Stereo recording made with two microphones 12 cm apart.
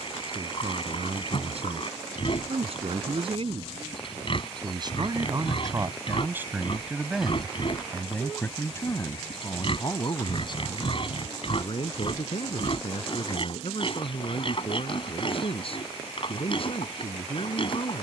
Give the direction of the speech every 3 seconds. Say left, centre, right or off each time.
right, right, centre, left, left, left.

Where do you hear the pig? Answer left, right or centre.
left.